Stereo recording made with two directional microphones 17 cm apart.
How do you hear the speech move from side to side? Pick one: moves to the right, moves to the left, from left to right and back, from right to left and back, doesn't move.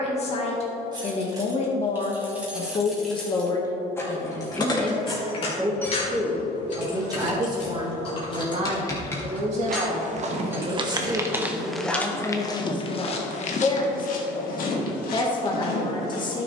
from left to right and back.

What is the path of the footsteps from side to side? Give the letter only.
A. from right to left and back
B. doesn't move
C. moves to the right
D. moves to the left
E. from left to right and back
D.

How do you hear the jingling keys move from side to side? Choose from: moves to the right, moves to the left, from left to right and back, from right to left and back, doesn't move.
from right to left and back.